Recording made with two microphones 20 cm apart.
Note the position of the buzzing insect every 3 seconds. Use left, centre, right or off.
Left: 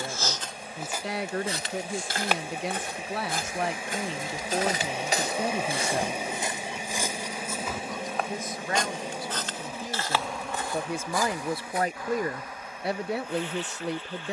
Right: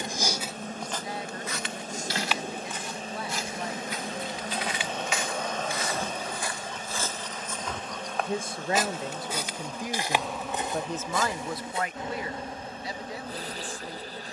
right, centre, left, centre, right.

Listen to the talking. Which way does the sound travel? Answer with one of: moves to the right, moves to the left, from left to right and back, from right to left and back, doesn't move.
from left to right and back.